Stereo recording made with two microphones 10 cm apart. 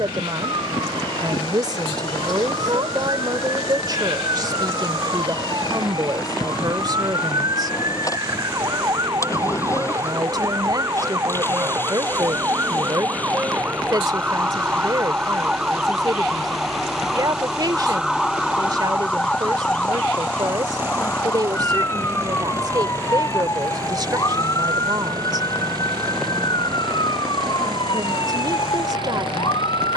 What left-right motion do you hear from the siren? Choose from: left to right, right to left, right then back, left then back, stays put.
right to left.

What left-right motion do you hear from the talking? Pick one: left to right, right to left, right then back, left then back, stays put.
stays put.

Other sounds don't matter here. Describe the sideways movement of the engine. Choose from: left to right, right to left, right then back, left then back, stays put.
left to right.